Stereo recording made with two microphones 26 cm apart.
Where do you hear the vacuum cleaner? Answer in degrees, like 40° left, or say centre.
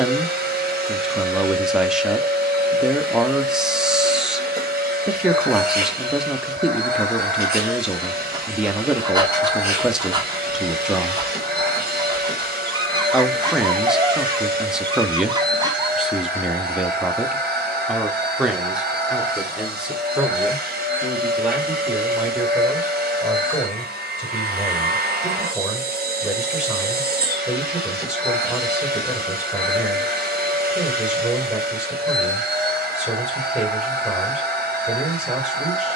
40° right.